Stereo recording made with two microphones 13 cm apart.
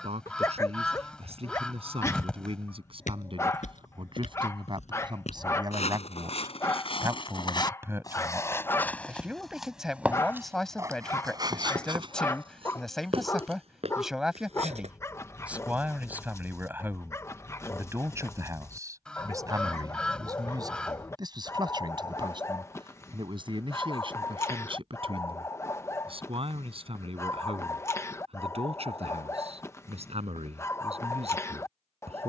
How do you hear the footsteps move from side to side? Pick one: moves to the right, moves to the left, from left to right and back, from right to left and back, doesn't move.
moves to the right.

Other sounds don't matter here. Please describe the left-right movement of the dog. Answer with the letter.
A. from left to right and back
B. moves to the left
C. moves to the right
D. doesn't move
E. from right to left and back
D.